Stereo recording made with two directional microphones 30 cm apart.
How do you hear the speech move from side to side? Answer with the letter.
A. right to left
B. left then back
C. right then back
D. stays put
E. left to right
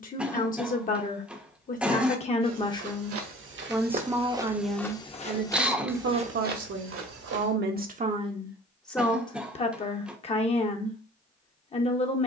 C.